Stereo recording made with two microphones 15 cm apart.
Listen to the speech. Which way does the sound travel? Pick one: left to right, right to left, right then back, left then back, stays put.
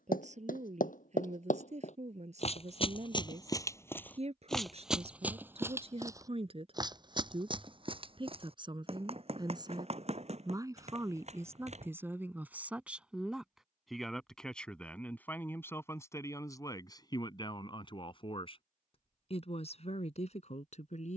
right to left.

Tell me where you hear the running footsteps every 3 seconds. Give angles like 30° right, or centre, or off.
60° left, 10° left, 30° right, 50° right, off, off, off.